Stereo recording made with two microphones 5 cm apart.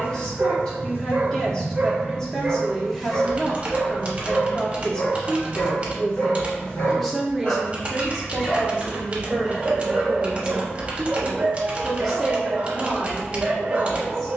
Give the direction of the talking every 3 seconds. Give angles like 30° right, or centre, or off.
10° left, 10° left, 10° right, 20° right, 10° left.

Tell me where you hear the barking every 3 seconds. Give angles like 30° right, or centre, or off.
30° right, 40° left, 30° left, 20° right, 30° right.